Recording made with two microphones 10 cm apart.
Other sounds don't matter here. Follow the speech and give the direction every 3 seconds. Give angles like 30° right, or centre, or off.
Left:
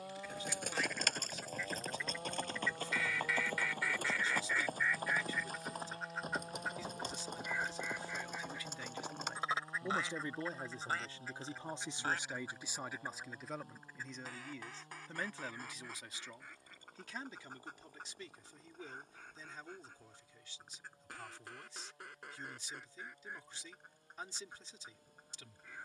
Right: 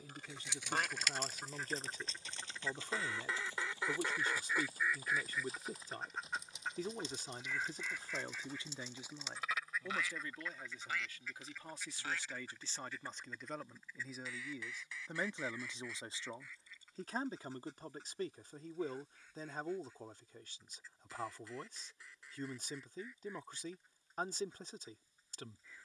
50° right, 50° right, 40° right, 20° left, centre, 30° right, 50° right, 50° right, 50° right.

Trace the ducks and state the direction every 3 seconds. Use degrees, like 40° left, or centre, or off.
50° right, 20° right, 10° left, 30° left, 40° left, 50° left, 60° left, 60° left, 60° left.